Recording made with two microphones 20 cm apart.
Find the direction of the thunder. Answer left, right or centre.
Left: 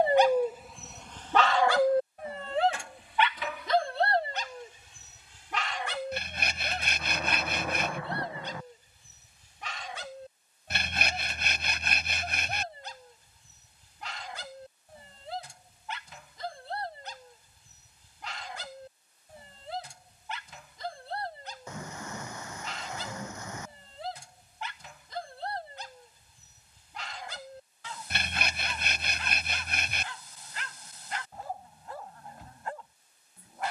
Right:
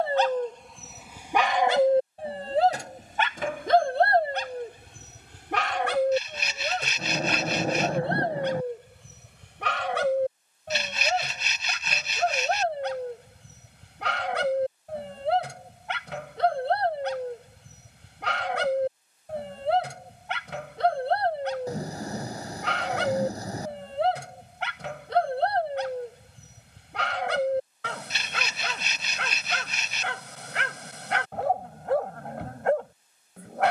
right.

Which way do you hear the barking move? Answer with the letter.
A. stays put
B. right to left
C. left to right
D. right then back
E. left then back
C.